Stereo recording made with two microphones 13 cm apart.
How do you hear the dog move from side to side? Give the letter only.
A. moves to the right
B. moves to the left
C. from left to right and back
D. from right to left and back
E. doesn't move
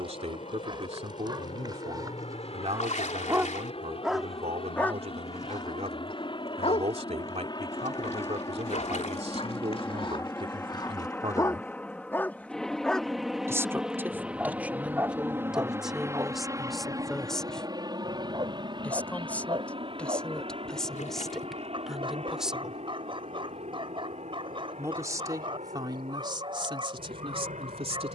D.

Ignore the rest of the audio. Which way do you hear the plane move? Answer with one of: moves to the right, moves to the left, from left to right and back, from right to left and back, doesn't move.
moves to the right.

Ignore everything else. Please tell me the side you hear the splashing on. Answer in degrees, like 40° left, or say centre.
70° left.